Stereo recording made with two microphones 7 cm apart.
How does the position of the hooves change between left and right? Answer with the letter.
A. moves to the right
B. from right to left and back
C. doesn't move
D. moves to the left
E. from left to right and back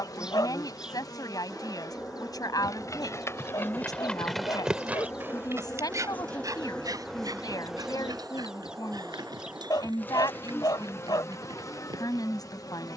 A.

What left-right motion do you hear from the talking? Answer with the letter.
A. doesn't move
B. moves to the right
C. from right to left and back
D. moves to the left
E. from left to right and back
A.